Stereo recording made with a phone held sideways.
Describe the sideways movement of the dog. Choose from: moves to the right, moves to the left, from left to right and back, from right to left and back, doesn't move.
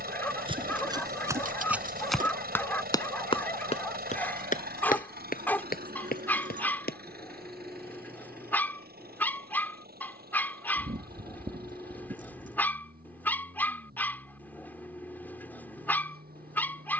doesn't move.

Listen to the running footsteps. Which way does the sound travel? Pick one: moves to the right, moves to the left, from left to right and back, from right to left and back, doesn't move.
moves to the left.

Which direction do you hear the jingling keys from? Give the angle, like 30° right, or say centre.
60° right.